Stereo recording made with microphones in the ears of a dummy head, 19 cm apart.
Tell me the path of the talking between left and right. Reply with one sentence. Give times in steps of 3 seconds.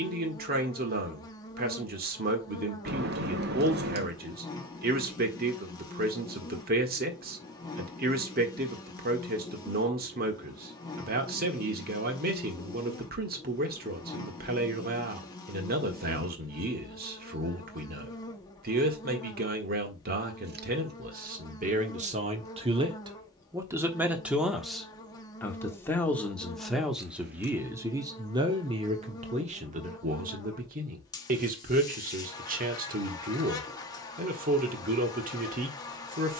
In this clip you hear the talking on the right from 0 s, in the centre from 24 s and on the right from 27 s.